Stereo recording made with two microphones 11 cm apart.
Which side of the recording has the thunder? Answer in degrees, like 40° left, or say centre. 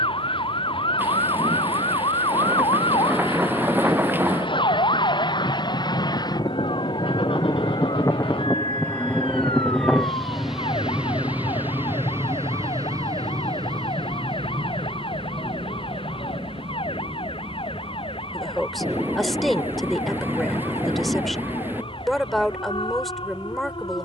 20° right.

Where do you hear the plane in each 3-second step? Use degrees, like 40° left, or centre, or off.
70° left, 50° left, 30° left, centre, 40° right, 50° right, 60° right, 70° right.